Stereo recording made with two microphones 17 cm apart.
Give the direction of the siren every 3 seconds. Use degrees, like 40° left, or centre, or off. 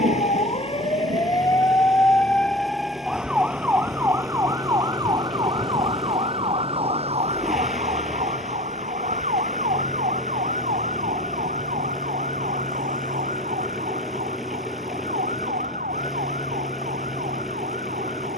20° left, 20° right, 40° right, 50° right, 50° right, 60° right.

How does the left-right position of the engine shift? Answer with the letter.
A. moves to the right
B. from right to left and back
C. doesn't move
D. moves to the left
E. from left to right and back
C.